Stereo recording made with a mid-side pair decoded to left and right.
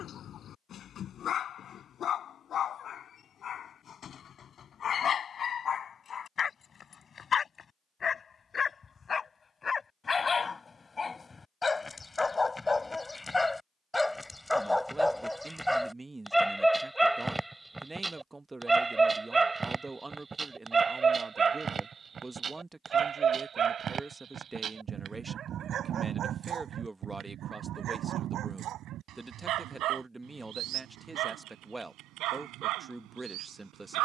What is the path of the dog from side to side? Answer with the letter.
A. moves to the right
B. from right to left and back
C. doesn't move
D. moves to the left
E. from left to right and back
A.